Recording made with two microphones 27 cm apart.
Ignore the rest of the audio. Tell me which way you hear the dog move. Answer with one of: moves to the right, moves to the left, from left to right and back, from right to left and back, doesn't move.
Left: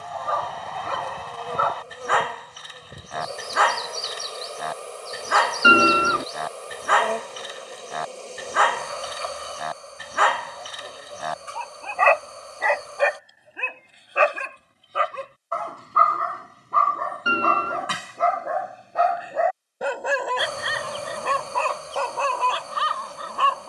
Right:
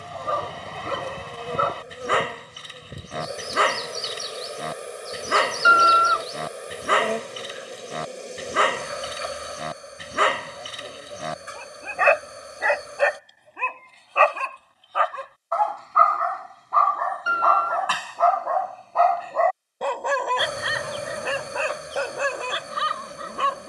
from right to left and back.